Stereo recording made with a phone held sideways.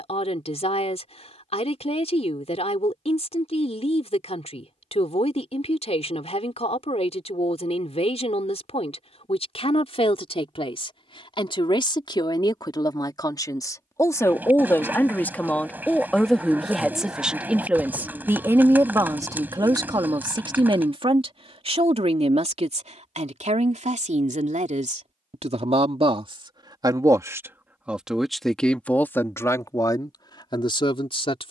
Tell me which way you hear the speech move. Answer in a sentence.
In this clip you hear the speech move from left to right and back again.